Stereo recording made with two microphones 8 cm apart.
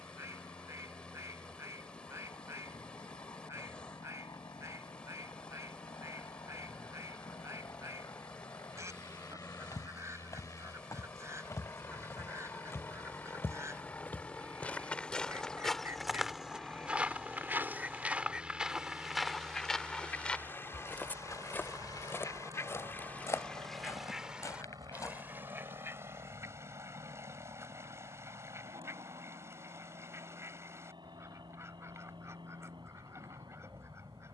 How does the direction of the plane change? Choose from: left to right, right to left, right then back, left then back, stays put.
left to right.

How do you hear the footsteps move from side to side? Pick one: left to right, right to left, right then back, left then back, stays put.
right then back.